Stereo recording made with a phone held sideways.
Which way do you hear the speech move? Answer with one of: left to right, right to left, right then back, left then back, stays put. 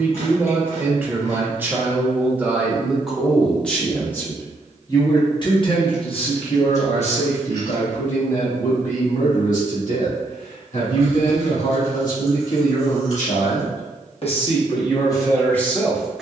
left then back.